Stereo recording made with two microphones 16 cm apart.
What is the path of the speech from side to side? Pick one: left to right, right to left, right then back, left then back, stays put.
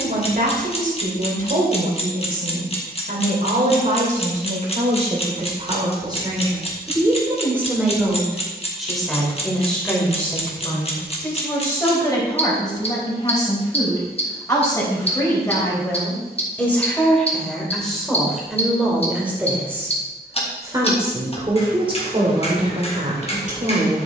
left then back.